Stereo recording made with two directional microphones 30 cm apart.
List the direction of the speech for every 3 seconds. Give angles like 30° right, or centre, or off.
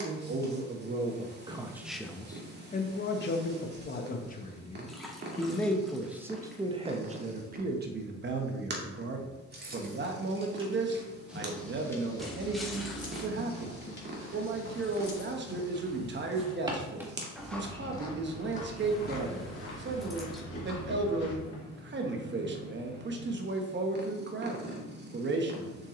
10° right, 30° left, 30° right, 40° right, 40° right, 40° right, 40° right, 40° right, 40° right.